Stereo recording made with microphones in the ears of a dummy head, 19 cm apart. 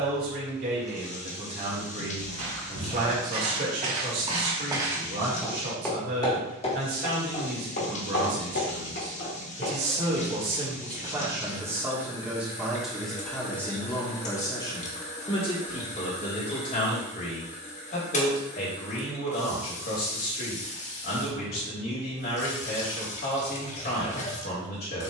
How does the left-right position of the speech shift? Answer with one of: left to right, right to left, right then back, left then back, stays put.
right to left.